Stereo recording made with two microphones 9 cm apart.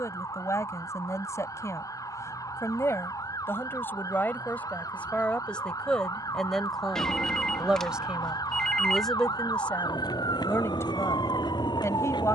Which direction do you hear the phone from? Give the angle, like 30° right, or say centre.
10° left.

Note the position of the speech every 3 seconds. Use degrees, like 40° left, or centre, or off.
30° left, 20° left, centre, 20° left.